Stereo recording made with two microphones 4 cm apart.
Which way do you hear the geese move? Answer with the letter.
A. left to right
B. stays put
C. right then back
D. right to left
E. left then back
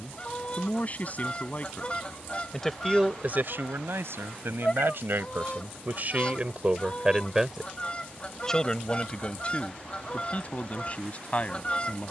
B.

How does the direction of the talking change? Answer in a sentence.
In this clip you hear the talking move from left to right and back again.